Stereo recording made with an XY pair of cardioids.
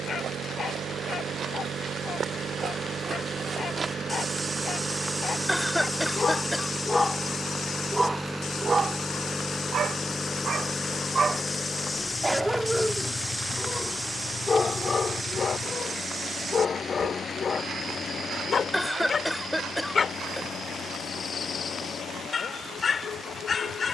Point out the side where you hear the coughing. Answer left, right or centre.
centre.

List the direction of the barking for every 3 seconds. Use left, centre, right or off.
left, left, centre, right, centre, left, left, left.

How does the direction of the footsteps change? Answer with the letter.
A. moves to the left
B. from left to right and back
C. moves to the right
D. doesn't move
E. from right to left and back
E.